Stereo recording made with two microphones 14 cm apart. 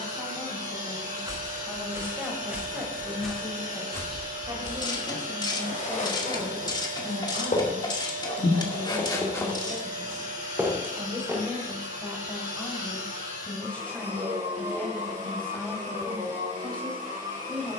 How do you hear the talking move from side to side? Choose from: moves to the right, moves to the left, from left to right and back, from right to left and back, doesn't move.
from left to right and back.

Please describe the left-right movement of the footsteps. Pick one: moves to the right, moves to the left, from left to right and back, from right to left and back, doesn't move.
from right to left and back.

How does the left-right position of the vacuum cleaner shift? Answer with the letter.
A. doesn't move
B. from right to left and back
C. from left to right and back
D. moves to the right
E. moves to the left
A.